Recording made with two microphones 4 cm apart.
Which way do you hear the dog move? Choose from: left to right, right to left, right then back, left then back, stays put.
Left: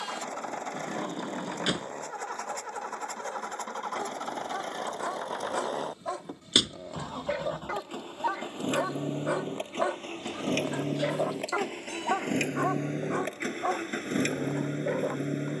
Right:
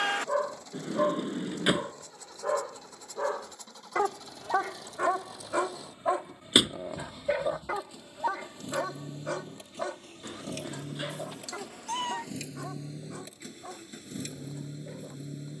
right to left.